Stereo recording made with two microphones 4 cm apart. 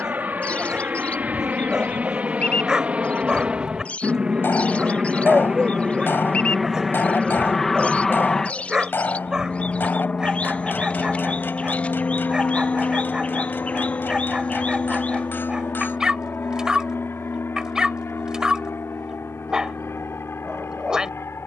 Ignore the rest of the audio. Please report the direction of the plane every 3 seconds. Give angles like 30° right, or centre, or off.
40° right, 20° right, 10° left, 30° left, 50° left, 60° left, 60° left.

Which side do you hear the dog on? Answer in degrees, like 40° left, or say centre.
20° right.